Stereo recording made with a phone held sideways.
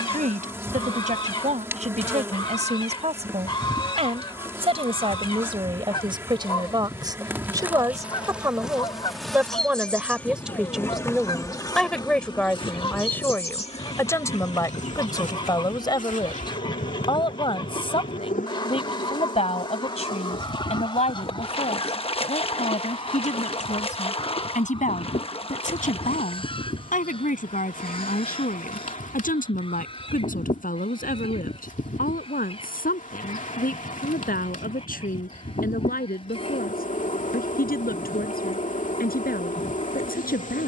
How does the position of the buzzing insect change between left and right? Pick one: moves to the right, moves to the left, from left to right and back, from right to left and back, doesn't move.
moves to the left.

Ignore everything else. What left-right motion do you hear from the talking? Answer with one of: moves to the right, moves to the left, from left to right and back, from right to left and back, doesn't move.
moves to the left.